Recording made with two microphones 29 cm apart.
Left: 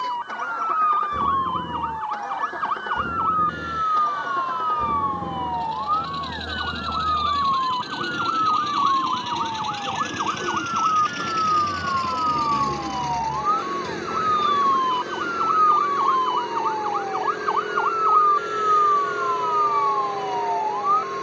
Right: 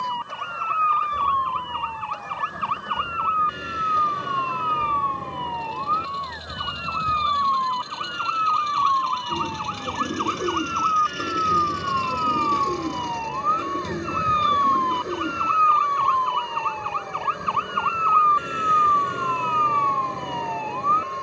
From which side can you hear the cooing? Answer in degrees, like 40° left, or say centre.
20° right.